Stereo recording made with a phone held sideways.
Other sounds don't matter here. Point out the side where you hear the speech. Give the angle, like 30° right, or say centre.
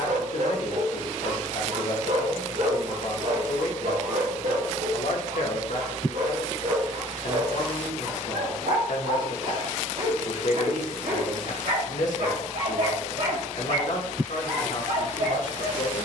70° left.